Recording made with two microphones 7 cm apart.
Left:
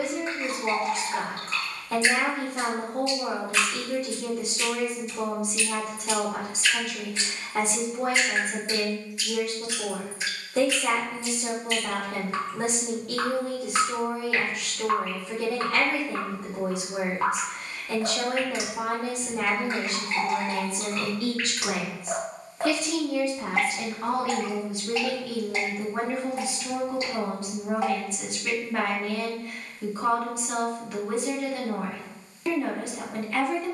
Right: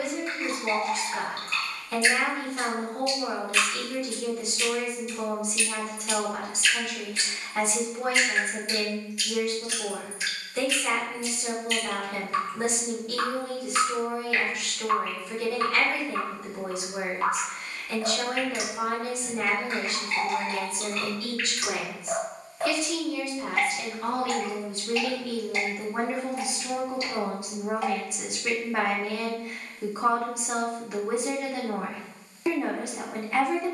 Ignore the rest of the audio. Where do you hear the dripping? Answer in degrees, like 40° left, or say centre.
30° left.